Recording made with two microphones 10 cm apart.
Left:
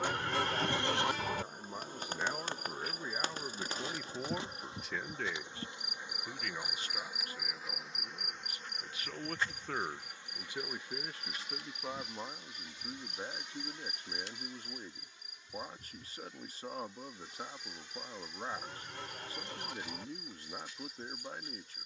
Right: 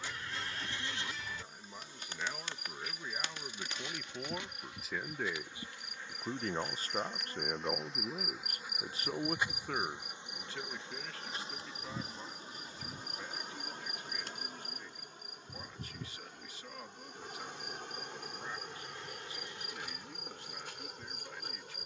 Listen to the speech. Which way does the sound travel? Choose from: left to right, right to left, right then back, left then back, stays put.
right then back.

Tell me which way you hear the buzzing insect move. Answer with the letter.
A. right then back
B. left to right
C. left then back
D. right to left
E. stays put
B.